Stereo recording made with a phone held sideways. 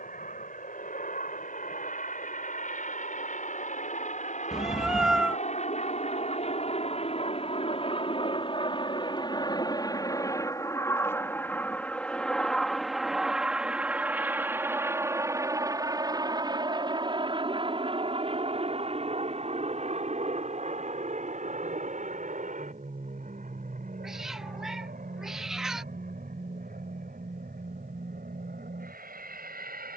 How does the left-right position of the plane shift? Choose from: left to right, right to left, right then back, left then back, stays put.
left to right.